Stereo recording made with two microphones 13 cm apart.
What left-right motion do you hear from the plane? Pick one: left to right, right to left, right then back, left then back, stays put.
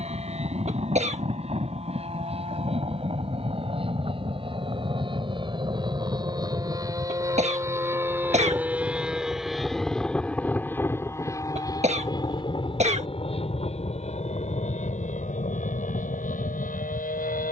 right to left.